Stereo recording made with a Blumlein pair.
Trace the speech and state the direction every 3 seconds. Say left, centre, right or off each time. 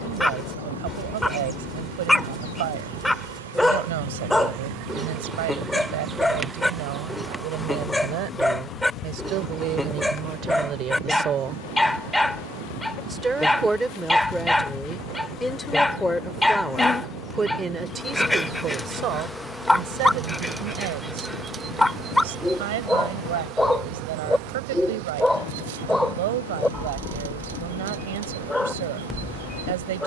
right, right, right, right, centre, centre, right, right, right, right.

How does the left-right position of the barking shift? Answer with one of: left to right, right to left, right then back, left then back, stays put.
stays put.